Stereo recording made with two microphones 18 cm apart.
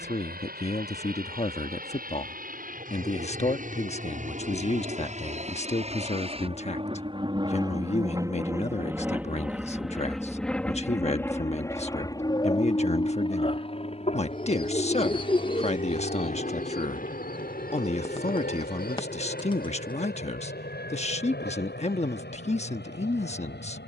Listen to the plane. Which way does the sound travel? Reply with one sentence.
You can hear the plane travel towards the left.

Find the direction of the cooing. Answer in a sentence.
You can hear the cooing on the left.